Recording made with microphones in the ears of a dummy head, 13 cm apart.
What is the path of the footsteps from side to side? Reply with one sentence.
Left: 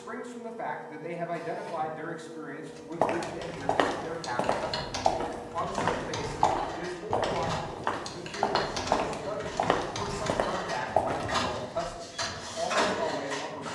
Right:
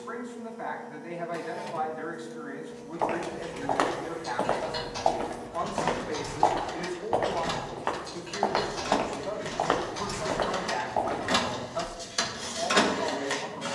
In this clip you hear the footsteps move from left to right and back again.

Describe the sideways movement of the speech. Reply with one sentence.
You can hear the speech move from left to right and back again.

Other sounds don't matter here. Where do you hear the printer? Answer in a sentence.
You can hear the printer on the right.